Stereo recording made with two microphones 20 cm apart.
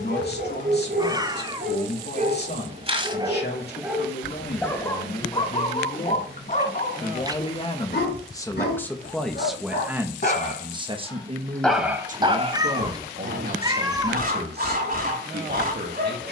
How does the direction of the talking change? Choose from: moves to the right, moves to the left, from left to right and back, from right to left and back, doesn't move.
moves to the right.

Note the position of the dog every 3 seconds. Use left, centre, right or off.
right, centre, left, left, right, right.